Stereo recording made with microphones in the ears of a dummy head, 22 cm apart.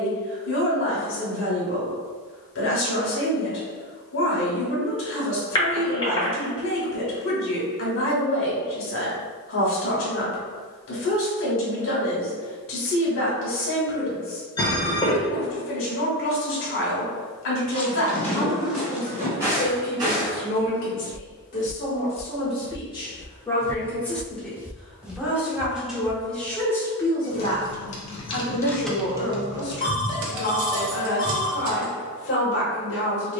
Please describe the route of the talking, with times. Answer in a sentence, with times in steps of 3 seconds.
You can hear the talking on the left from 0 s, in the centre from 24 s and on the left from 27 s.